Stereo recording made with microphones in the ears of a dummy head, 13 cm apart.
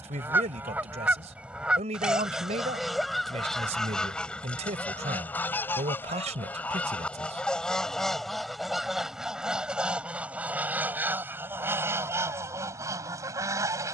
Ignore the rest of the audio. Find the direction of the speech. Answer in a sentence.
You can hear the speech on the right.